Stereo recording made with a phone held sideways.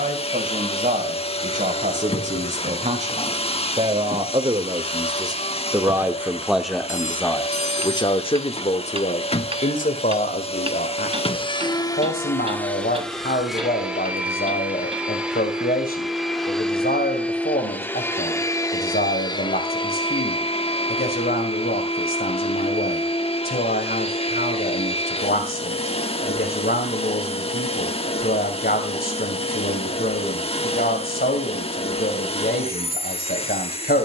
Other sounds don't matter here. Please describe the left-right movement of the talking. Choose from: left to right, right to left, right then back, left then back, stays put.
right to left.